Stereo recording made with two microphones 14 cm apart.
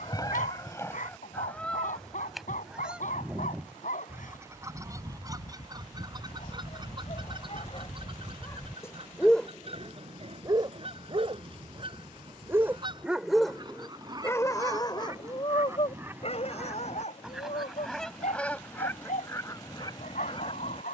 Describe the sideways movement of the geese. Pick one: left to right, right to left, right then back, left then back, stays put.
right then back.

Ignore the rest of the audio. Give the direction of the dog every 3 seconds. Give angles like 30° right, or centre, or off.
70° left, 70° left, 40° left, 20° right, 10° left, 50° left, 60° left.